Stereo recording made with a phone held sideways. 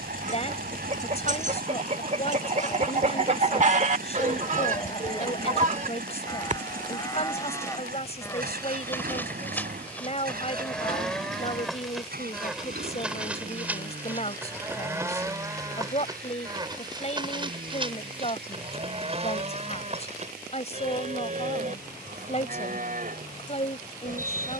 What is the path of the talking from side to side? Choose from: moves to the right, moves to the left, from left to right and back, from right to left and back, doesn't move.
doesn't move.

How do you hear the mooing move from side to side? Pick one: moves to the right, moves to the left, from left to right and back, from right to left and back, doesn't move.
moves to the right.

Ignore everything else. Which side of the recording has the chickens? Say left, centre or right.
right.